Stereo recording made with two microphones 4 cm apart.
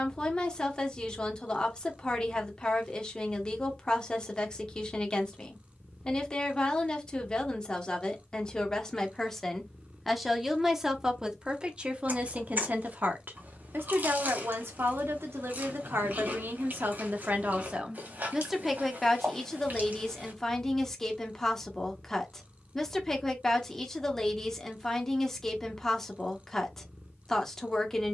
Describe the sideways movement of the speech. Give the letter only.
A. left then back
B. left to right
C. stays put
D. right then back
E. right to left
D.